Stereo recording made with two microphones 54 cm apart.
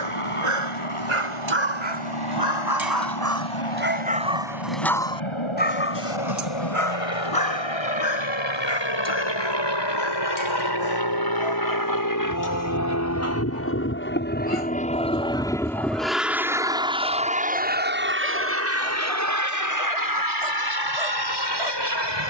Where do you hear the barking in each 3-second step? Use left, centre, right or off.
right, centre, left, left, left, left, left, left.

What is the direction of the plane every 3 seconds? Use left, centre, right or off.
left, left, left, left, left, centre, right, right.